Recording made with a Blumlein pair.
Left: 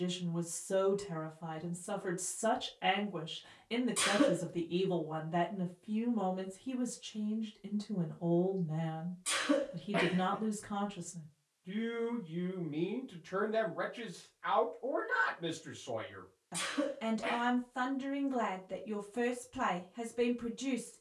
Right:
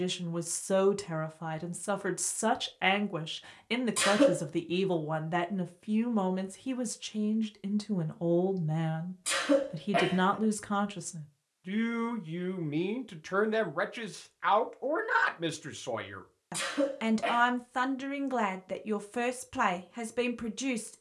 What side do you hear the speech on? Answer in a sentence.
In this clip you hear the speech on the right.